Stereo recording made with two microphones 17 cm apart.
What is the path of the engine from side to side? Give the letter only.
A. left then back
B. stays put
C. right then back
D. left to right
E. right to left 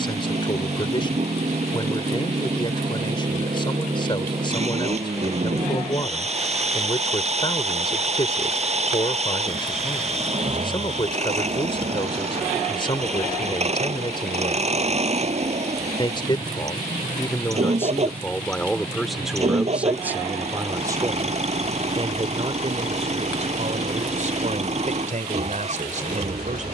B.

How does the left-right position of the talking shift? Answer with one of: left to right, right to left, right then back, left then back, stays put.
left to right.